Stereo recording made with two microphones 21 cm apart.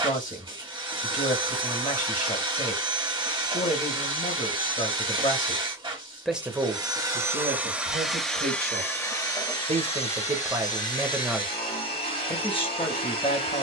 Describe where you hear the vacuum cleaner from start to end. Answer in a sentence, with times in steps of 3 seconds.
You can hear the vacuum cleaner on the right from 0 s, in the centre from 6 s and on the left from 9 s.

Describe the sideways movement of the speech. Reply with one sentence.
You can hear the speech go right and come back.